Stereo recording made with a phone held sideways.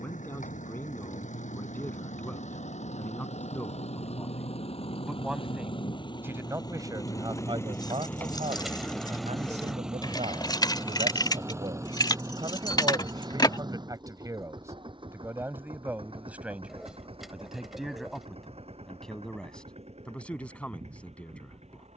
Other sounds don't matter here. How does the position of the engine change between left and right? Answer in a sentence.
In this clip you hear the engine go from the left side to the right.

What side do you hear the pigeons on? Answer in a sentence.
In this clip you hear the pigeons in the centre.